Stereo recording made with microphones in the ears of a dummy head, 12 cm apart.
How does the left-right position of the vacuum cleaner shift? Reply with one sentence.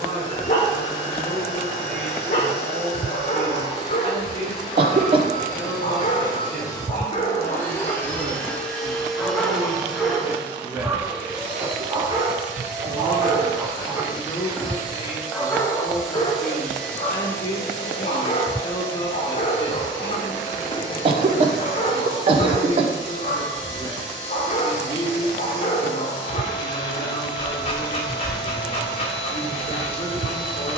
In this clip you hear the vacuum cleaner go right and come back.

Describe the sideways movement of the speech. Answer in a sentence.
You can hear the speech move to the left.